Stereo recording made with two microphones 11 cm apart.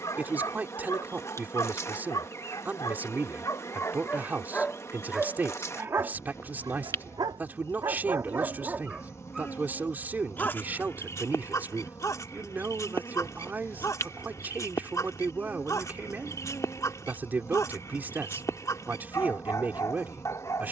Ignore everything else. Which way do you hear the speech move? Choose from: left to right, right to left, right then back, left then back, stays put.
stays put.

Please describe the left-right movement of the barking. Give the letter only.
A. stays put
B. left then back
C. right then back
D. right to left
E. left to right
C.